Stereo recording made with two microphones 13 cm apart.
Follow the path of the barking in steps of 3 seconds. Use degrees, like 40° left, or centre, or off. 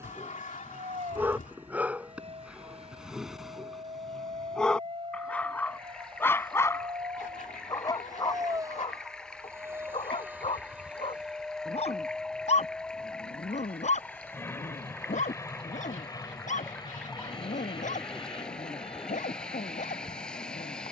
10° right, centre, 30° left, 50° left, 60° left, 80° left, 80° left.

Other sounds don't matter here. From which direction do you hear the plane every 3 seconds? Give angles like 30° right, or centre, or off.
60° right, 50° right, 30° right, 10° right, 10° left, 30° left, 40° left.